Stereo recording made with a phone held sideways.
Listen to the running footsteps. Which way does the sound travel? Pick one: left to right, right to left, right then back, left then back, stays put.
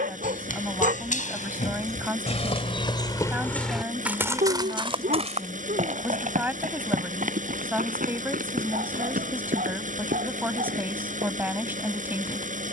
left to right.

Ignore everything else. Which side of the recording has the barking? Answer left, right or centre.
right.